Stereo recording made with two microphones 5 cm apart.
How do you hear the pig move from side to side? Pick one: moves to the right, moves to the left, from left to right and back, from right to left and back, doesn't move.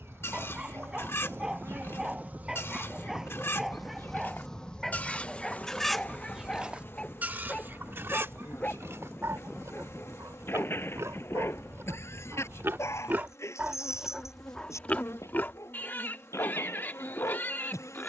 from left to right and back.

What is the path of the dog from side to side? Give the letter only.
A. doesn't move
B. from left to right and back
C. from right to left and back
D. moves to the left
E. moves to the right
D.